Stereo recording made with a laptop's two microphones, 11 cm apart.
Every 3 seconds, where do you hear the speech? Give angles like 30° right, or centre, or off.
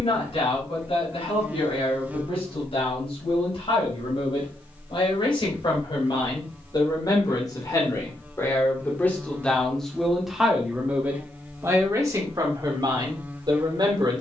60° left, 50° left, 30° left, centre, 40° right.